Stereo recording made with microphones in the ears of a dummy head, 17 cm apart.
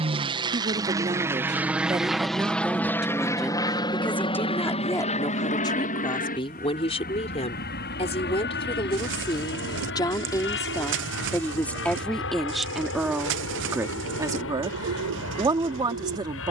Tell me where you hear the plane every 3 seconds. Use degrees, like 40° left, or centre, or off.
10° right, 30° left, 50° left, 60° left, 60° left, 70° left.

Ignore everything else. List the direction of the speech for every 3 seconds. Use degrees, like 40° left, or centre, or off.
20° right, 10° left, 30° left, 20° left, 10° right, 20° right.